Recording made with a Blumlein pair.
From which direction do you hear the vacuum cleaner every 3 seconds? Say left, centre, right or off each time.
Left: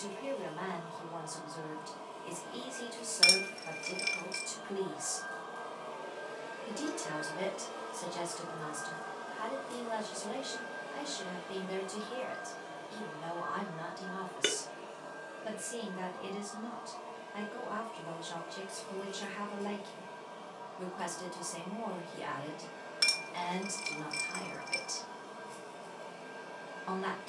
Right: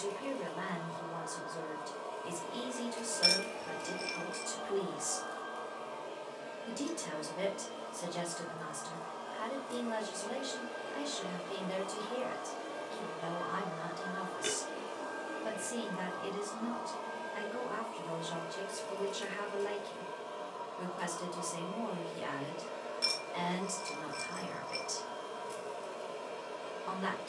right, right, centre, centre, right, right, right, right, right.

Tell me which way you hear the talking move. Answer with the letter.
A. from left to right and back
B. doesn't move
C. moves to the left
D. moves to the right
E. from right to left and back
B.